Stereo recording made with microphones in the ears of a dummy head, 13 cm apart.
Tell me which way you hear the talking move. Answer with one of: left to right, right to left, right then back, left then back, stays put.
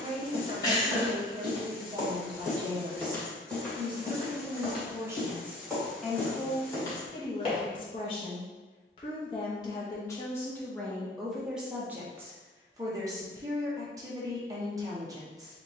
left then back.